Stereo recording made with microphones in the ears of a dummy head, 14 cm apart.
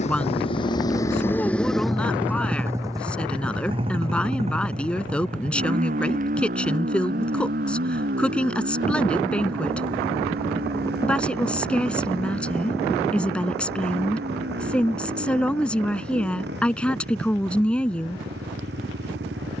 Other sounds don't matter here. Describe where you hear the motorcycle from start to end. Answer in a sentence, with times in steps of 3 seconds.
You can hear the motorcycle in the centre from 0 s and on the right from 3 s.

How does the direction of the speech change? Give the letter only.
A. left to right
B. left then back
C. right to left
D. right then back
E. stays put
E.